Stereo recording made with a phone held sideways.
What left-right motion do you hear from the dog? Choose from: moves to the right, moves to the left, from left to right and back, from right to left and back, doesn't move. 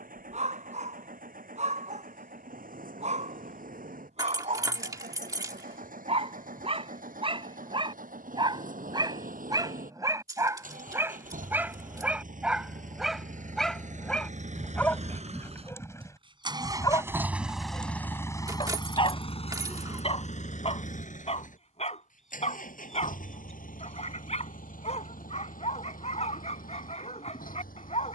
moves to the left.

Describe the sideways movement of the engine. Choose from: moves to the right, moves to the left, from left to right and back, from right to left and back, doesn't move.
moves to the left.